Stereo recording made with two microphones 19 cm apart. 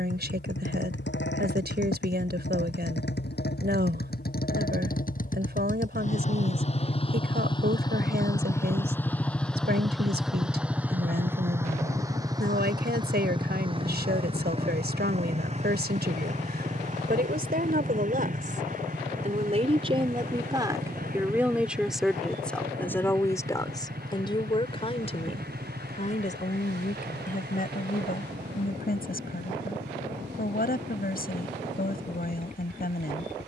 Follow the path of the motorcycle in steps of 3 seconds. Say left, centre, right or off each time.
left, left, left, centre, right, right, right, right, right, right, right.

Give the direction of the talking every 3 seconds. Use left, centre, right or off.
right, right, right, right, right, right, right, centre, left, left, left.